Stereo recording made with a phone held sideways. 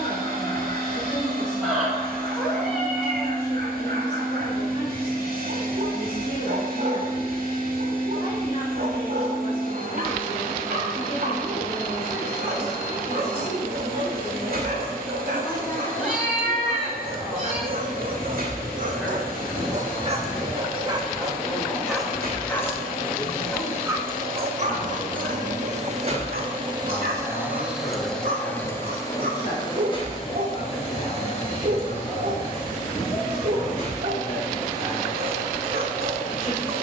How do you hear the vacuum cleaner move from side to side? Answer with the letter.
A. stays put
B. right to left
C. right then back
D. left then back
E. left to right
B.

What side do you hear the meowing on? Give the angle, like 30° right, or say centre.
centre.